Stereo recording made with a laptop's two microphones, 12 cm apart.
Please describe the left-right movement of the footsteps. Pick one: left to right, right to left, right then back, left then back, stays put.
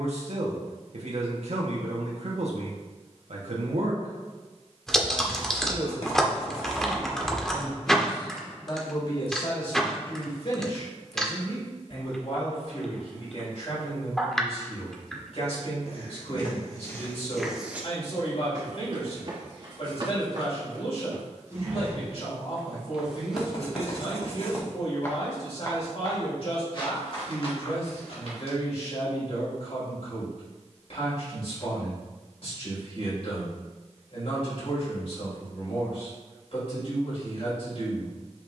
right then back.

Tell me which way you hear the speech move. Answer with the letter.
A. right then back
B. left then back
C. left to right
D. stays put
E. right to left
E.